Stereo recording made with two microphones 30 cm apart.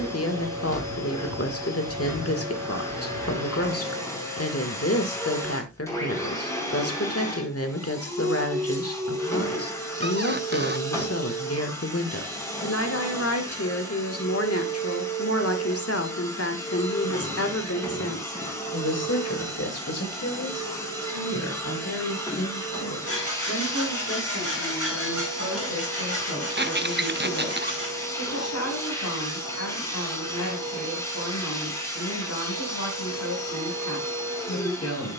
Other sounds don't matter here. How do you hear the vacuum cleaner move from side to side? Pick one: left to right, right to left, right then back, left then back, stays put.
stays put.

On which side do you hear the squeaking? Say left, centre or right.
right.